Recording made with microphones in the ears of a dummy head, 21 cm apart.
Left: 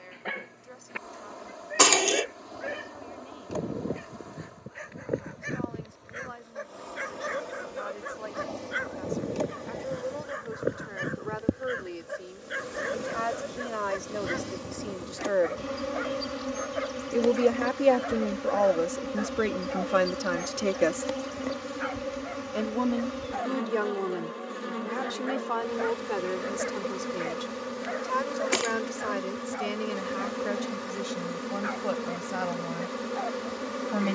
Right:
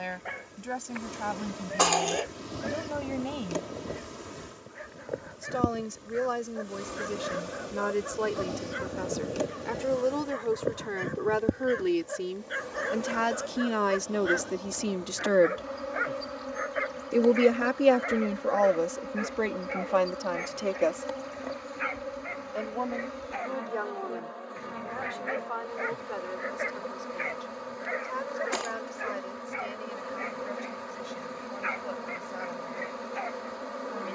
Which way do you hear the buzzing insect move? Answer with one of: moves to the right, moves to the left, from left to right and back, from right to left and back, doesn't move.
moves to the left.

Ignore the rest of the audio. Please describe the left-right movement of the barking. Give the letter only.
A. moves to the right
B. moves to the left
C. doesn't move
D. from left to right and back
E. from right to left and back
A.